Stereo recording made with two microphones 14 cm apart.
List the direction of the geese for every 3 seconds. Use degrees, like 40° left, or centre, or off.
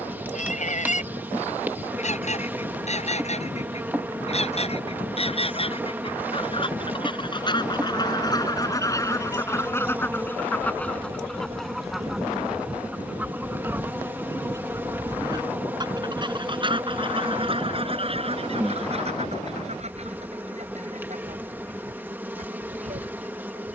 60° left, 50° left, 30° left, 10° left, 10° right, 40° right, 50° right, 60° right.